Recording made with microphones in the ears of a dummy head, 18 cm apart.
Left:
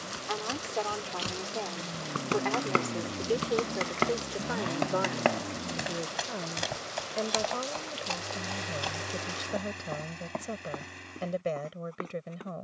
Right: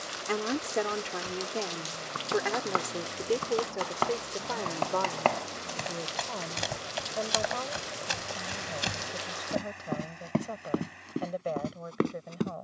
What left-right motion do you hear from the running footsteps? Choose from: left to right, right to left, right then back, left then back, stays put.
left to right.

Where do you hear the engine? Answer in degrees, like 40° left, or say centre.
50° left.